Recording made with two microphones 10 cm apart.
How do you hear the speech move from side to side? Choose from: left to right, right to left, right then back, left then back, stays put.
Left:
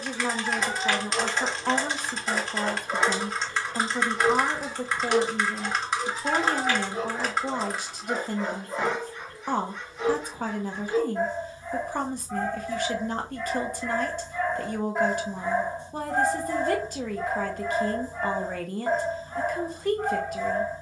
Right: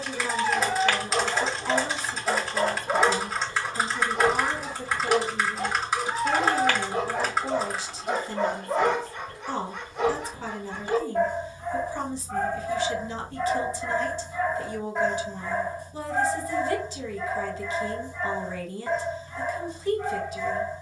stays put.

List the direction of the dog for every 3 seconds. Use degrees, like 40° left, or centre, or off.
60° right, 60° right, 60° right, 60° right, 30° right, 30° left, 40° left.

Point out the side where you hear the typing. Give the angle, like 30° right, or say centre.
centre.